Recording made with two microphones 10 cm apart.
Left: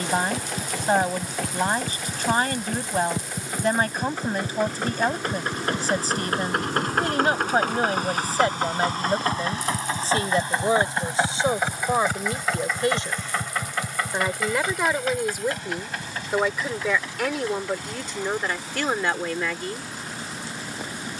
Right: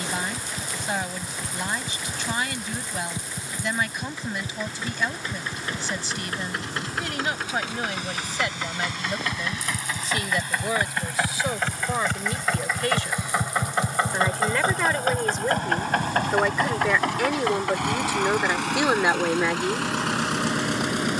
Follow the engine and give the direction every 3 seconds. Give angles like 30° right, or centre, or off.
60° left, 60° left, 50° left, 30° left, 20° right, 60° right, 80° right.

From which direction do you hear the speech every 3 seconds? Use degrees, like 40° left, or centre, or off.
40° left, 40° left, 40° left, 30° left, 20° left, centre, 10° right.